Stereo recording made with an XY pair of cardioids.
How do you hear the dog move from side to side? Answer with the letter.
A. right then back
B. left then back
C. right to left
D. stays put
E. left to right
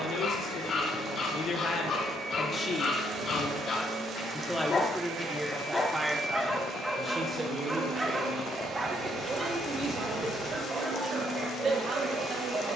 E.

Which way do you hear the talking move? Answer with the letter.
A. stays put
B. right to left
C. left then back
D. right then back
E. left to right
E.